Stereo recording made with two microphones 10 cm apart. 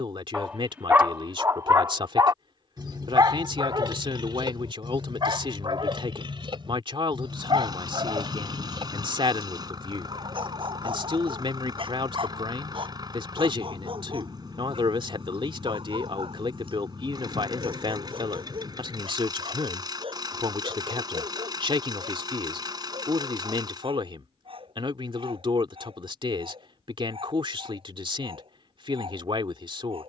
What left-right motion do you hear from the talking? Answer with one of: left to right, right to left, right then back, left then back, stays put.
stays put.